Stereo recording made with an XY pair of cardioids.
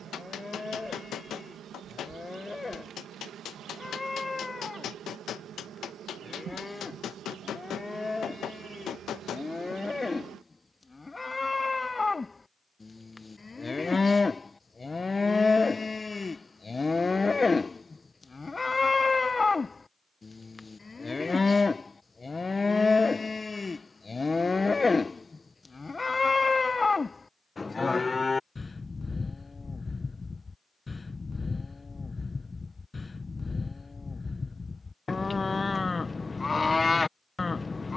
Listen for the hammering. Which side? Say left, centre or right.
left.